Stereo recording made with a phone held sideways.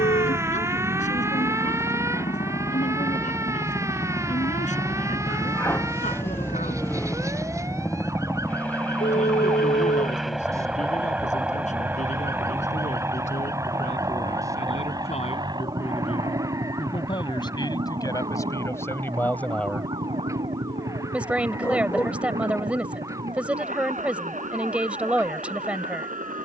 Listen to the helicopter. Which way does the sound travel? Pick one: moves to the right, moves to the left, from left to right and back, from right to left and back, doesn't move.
moves to the right.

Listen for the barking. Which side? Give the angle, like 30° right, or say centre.
20° left.